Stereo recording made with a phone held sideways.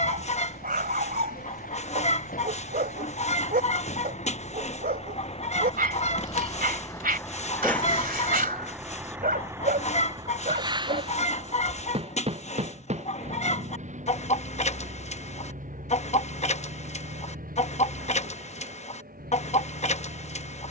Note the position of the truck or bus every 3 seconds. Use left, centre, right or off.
left, left, centre, right, right, right, right.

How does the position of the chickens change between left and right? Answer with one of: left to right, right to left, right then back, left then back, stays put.
stays put.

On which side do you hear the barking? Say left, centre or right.
right.